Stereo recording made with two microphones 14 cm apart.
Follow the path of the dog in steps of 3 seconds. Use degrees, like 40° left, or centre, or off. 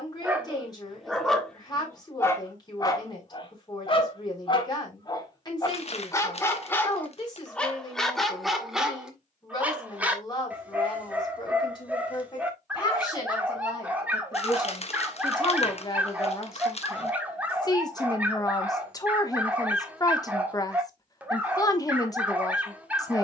10° left, 30° left, 10° left, 10° right, 10° right, 10° right, 10° right, 10° right.